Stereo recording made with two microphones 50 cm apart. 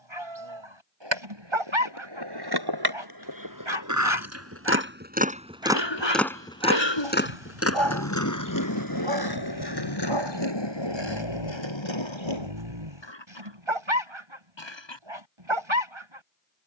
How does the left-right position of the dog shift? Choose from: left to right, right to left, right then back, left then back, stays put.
stays put.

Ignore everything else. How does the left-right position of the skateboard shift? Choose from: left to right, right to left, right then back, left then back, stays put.
right to left.